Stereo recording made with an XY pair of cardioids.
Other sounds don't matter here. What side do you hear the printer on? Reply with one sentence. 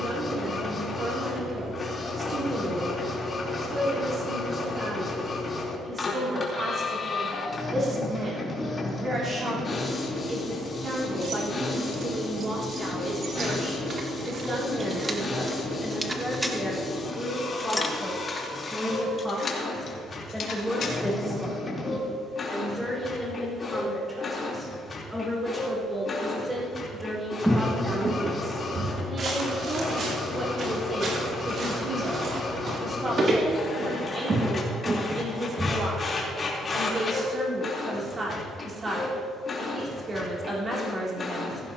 You can hear the printer on the left.